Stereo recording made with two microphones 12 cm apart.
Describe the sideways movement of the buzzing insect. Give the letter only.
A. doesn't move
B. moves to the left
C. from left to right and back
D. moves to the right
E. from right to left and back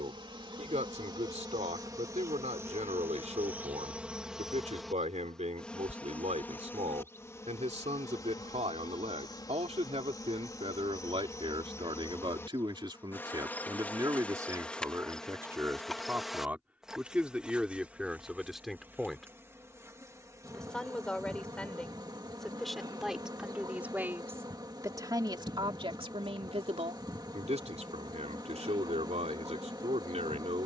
E.